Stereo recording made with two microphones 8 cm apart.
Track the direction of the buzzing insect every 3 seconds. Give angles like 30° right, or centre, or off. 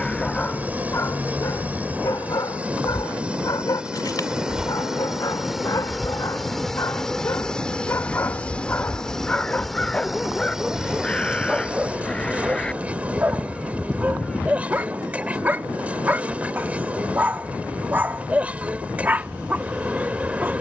20° right, 10° right, 10° left, centre, 20° right, 20° right, 20° right.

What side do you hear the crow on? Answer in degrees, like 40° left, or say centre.
10° left.